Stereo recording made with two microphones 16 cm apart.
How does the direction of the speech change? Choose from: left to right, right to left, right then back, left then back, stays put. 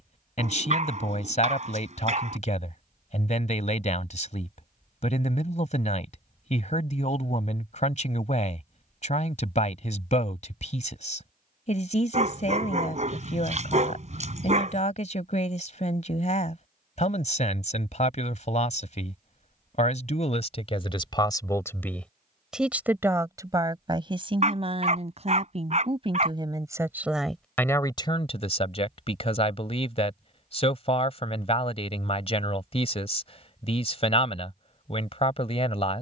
right then back.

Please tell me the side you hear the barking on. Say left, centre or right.
right.